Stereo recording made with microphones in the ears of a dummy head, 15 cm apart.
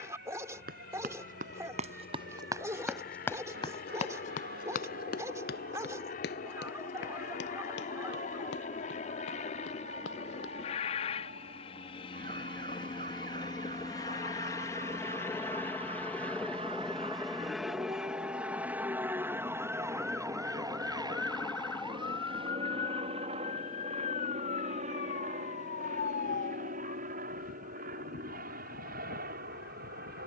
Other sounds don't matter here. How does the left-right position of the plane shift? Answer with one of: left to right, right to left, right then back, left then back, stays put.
left to right.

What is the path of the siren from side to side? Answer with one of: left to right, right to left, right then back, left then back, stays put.
right to left.